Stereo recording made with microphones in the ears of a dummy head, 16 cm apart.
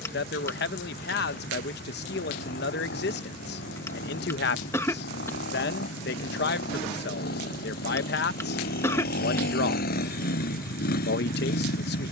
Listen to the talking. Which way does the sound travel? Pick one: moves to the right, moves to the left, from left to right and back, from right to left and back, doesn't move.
doesn't move.